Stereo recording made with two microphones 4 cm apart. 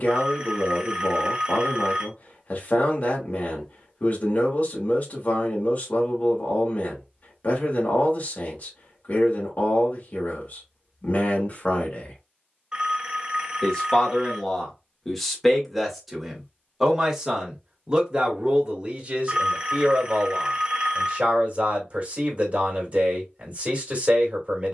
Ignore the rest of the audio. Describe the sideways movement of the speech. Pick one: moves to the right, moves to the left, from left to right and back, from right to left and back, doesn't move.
moves to the right.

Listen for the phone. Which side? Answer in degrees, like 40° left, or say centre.
20° right.